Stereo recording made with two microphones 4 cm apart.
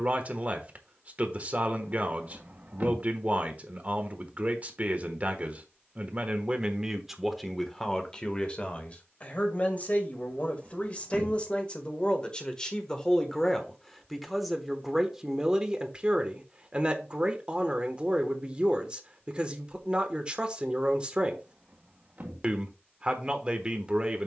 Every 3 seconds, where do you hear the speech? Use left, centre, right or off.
right, right, centre, left, centre, right, right, right.